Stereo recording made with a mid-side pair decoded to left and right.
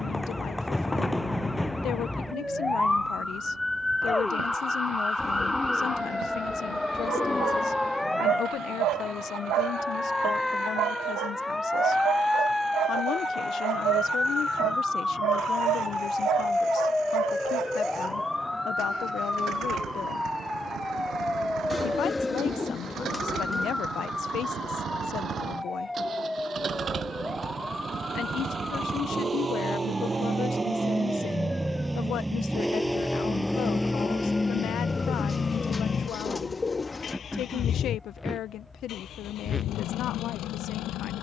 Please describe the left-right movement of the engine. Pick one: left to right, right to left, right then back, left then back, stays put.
right to left.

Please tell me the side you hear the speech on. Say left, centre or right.
left.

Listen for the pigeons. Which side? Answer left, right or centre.
left.